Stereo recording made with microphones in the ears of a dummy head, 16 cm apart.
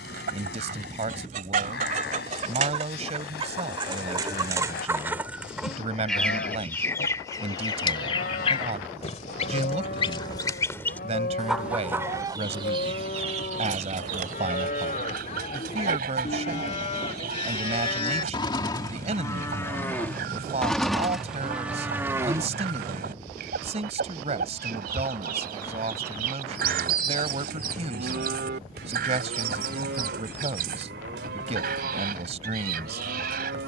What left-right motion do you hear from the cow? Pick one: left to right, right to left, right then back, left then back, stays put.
left to right.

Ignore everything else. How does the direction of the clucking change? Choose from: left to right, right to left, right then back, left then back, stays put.
left then back.